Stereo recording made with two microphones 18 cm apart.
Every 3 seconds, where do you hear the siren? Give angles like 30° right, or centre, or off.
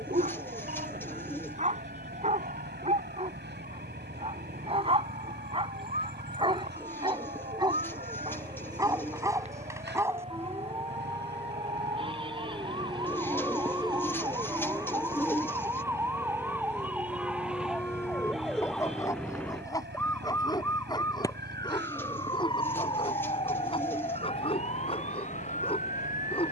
50° right, 50° right, 40° right, 40° right, 30° right, 10° right, 10° left, 30° left, 40° left.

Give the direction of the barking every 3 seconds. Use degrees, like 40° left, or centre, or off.
40° right, 30° right, 20° right, 10° right, centre, 10° left, 20° left, 30° left, 30° left.